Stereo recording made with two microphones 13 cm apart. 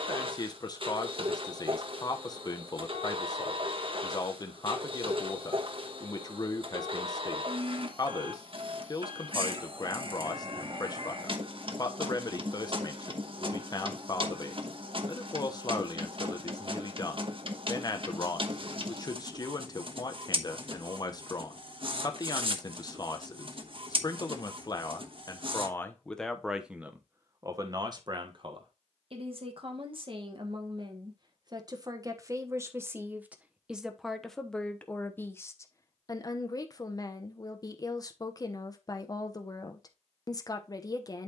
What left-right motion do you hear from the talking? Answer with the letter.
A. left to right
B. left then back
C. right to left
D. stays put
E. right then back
E.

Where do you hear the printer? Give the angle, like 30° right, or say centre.
50° right.